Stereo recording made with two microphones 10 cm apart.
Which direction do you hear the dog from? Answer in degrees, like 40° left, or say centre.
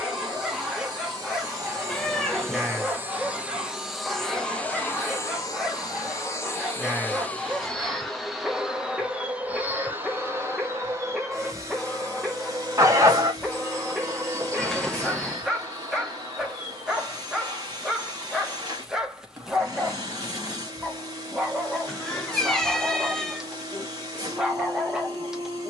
10° right.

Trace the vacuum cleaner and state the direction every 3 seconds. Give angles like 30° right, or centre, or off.
40° right, 10° left, 10° left, 20° right, 40° right, 40° right, 40° right, 40° right, 40° right.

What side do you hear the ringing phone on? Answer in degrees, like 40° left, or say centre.
30° right.